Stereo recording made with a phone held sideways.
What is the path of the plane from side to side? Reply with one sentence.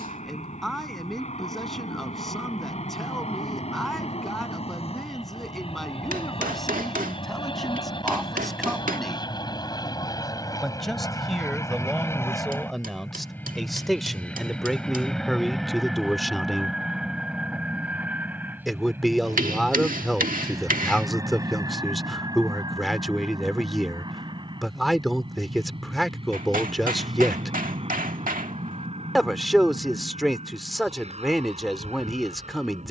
You can hear the plane move to the right.